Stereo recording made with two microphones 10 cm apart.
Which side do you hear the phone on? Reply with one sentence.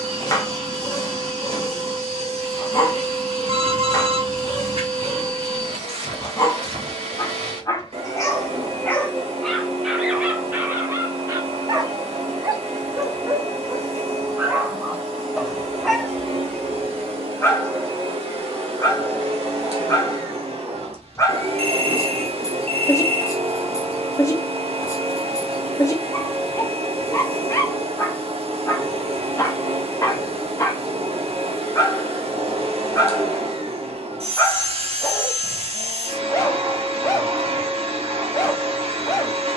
In this clip you hear the phone on the right.